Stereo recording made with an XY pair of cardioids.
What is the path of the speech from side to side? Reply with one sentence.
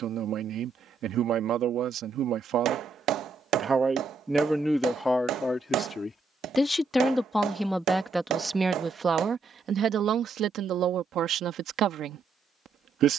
In this clip you hear the speech move from right to left and back again.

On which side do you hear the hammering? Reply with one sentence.
In this clip you hear the hammering on the right.